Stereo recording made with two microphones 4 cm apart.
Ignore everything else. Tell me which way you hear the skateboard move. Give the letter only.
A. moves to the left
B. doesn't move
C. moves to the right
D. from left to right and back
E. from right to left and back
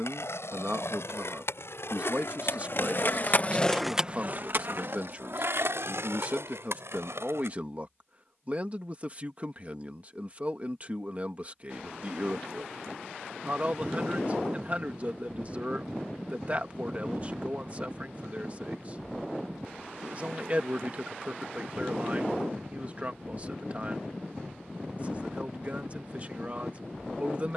C.